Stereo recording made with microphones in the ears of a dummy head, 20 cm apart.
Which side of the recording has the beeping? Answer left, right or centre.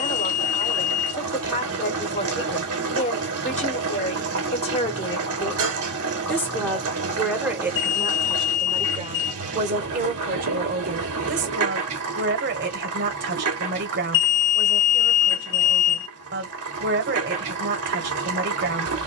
left.